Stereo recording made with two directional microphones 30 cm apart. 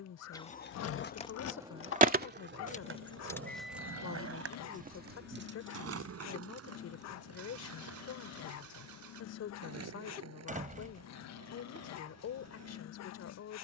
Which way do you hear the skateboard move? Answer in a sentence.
In this clip you hear the skateboard move from left to right.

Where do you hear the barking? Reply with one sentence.
You can hear the barking on the left.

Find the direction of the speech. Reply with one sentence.
In this clip you hear the speech on the left.